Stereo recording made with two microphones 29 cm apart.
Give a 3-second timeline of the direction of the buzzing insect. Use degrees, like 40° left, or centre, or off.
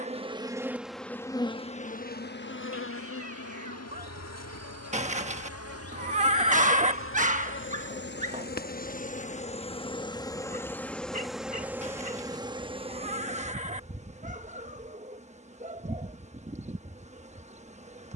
10° left, 60° left, 40° left, 10° left, 20° right, 20° right.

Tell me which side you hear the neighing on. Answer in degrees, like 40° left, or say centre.
20° right.